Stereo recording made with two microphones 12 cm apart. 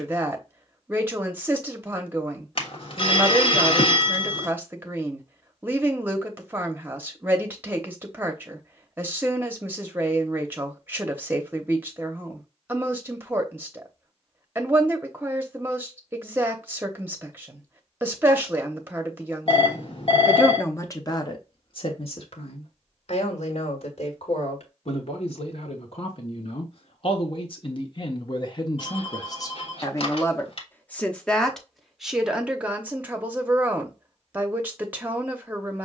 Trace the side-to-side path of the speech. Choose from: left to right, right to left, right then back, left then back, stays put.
left then back.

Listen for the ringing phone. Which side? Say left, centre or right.
left.